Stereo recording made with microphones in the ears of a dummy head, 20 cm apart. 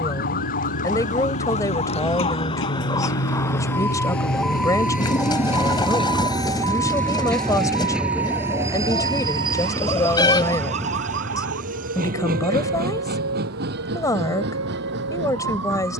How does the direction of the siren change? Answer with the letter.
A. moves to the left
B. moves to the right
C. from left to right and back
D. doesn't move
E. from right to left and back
B.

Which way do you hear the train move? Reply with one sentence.
You can hear the train go from the left side to the right.